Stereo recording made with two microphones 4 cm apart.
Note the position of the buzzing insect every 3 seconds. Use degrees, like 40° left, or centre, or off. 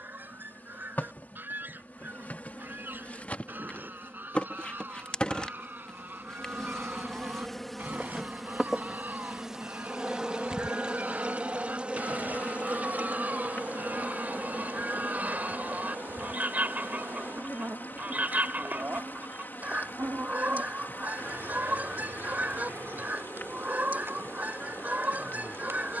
40° left, 30° left, 10° left, 20° right, 40° right, 50° right, 60° right, 70° right, 70° right.